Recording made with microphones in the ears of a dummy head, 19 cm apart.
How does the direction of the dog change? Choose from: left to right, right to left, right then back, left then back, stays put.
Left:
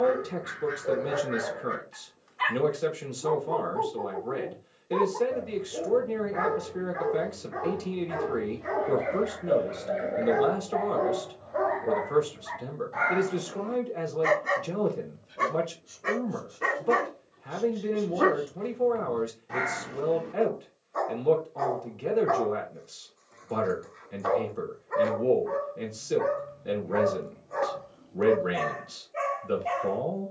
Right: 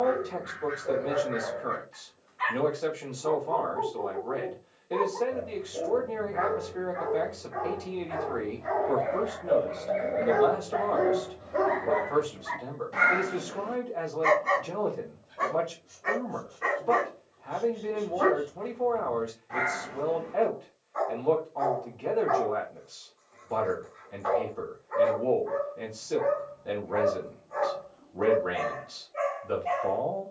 right then back.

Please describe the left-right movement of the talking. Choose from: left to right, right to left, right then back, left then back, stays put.
stays put.